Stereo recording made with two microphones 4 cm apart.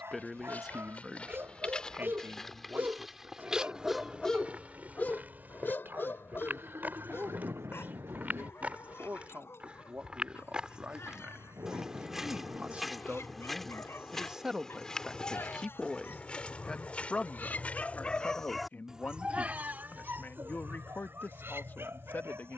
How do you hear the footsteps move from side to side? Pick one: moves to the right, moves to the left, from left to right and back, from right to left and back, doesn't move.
from left to right and back.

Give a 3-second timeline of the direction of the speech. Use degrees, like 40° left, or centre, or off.
30° right, 50° right, 50° right, 40° right, 20° right, 20° left, 50° left, 50° left.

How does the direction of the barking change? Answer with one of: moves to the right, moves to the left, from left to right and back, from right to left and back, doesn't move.
from right to left and back.